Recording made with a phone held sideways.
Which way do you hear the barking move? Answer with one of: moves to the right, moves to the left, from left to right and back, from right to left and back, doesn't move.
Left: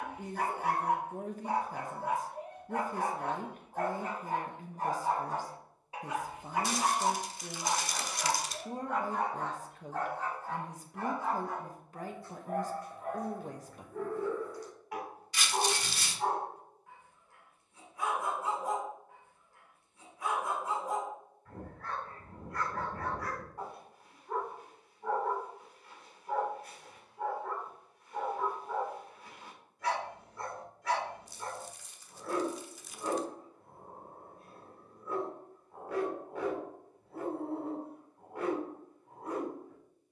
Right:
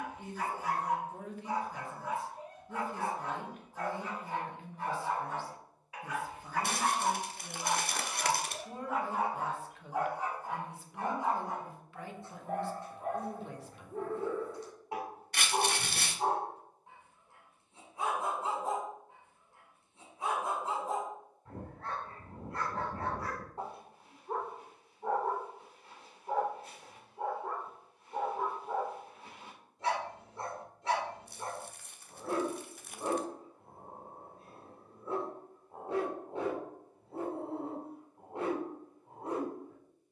moves to the right.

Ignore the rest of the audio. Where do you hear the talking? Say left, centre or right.
left.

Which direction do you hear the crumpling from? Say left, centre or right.
right.